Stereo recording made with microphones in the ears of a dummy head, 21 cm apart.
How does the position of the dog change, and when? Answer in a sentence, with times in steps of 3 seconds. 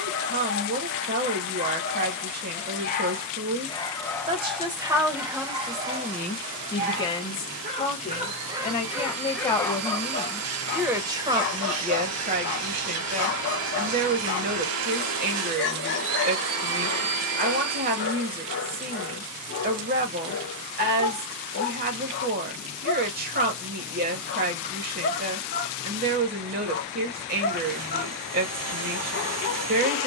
In this clip you hear the dog on the left from 0 s, in the centre from 3 s, on the right from 6 s and on the left from 9 s.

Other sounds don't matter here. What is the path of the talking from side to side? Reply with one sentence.
You can hear the talking go left and come back.